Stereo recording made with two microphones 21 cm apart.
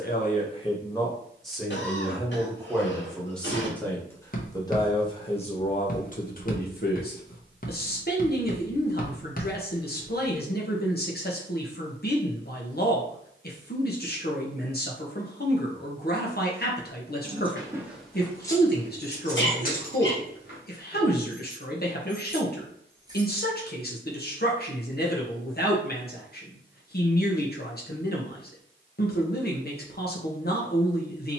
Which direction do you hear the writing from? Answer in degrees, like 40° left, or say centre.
40° left.